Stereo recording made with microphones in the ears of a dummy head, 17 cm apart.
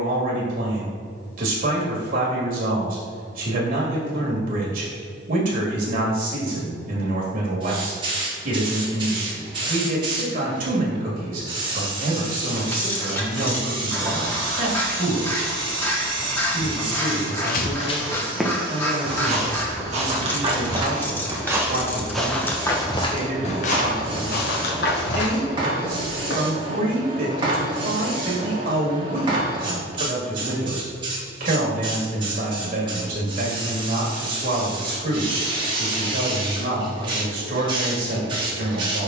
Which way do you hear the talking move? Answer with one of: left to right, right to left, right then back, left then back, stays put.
stays put.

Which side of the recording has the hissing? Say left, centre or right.
right.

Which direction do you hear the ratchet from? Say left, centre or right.
centre.